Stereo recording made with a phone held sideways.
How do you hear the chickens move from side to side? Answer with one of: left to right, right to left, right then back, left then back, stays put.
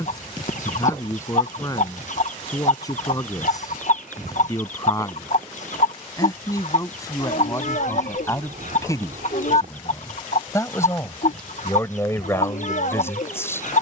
stays put.